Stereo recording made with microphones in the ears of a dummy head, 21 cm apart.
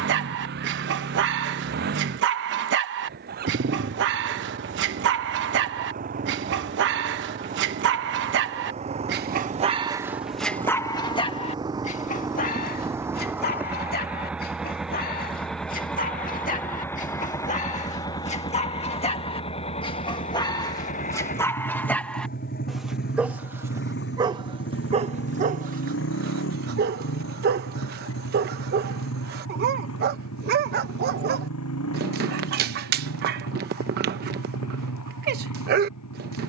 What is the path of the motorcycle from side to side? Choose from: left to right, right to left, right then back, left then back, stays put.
right to left.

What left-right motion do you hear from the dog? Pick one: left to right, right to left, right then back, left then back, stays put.
left then back.